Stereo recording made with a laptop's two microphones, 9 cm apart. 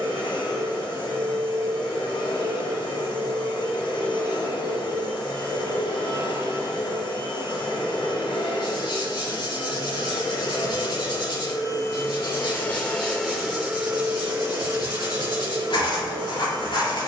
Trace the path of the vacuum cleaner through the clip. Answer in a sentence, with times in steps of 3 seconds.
You can hear the vacuum cleaner on the left from 0 s, in the centre from 12 s and on the right from 15 s.